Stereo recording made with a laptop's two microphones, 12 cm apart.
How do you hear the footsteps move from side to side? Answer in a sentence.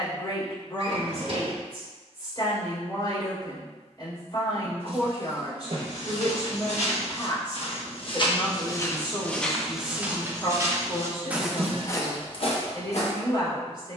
In this clip you hear the footsteps move from left to right and back again.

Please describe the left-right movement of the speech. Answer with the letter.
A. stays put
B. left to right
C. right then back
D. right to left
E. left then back
A.